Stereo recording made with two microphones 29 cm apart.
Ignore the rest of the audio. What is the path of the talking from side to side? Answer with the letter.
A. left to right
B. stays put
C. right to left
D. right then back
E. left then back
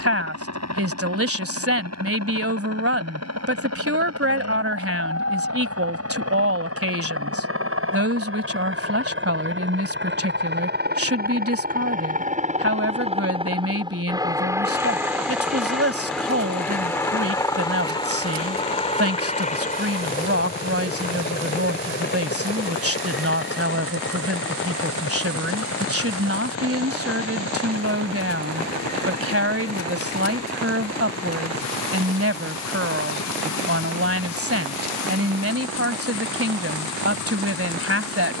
B.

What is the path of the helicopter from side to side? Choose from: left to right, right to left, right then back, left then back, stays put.
right to left.